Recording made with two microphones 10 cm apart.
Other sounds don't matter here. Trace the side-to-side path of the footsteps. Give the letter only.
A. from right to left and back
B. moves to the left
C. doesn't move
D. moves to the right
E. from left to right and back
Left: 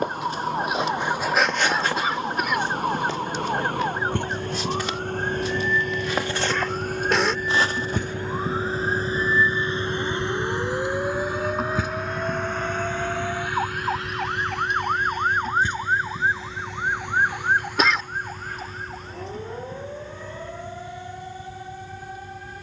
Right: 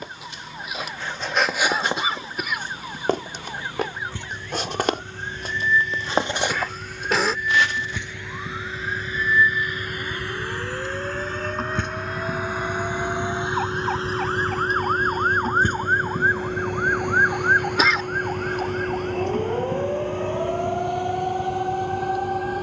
E.